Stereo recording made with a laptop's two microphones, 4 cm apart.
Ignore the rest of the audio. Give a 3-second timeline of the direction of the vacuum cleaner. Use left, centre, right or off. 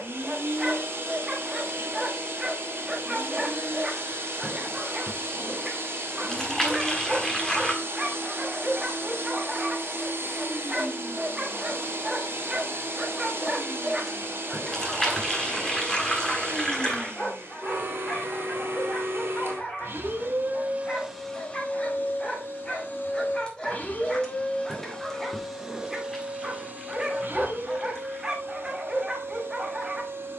right, right, right, right, right, right, right, left, centre, right.